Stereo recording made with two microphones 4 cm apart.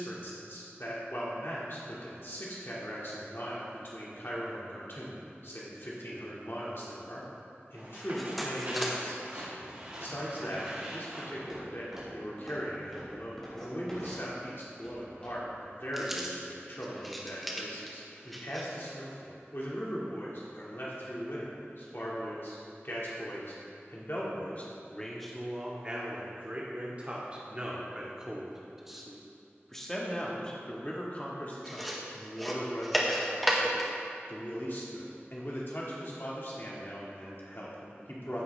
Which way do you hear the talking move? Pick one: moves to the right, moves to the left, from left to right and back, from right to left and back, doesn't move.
from left to right and back.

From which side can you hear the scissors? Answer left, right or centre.
centre.